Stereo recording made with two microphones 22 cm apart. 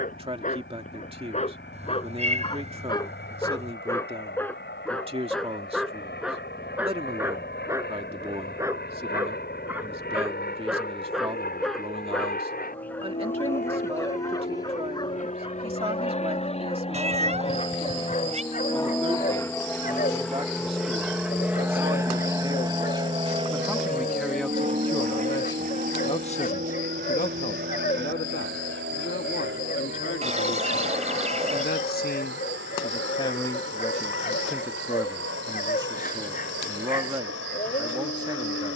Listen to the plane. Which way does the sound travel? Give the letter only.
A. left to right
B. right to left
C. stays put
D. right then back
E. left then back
A.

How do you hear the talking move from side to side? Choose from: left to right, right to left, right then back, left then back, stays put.
left then back.